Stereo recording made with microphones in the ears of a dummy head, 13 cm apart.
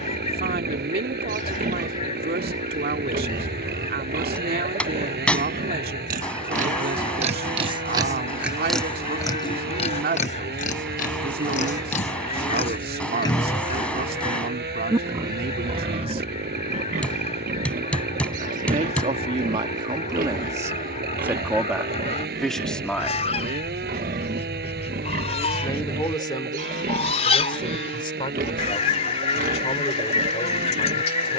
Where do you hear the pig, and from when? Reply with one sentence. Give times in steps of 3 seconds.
In this clip you hear the pig on the right from 0 s, on the left from 9 s and on the right from 15 s.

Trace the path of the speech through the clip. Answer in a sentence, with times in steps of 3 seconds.
In this clip you hear the speech on the right from 0 s, in the centre from 21 s and on the left from 24 s.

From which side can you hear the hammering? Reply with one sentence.
You can hear the hammering in the centre.